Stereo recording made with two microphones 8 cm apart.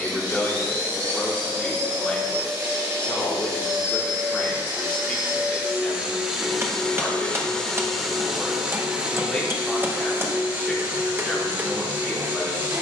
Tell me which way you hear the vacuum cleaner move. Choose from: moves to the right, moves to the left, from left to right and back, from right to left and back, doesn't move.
from right to left and back.